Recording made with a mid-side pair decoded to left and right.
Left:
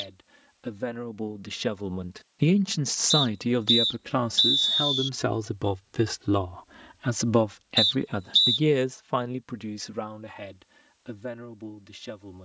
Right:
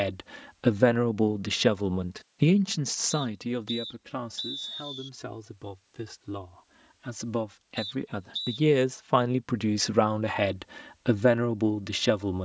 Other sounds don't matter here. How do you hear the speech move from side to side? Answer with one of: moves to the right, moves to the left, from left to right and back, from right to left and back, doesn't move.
from right to left and back.